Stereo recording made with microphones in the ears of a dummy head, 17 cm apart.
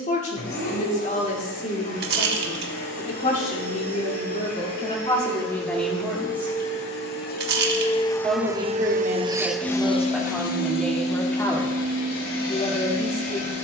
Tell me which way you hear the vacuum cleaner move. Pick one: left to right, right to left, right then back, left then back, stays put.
right then back.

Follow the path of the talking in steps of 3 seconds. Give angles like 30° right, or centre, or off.
40° left, 30° left, 20° right, centre, 30° left.